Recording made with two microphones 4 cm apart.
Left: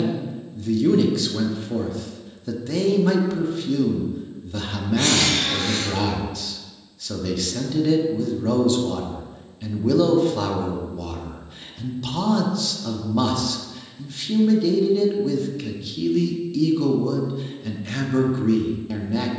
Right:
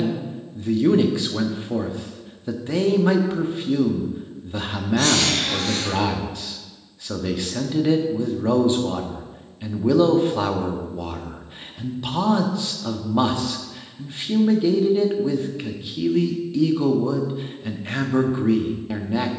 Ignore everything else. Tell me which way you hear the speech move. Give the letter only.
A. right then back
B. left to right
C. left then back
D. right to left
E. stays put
E.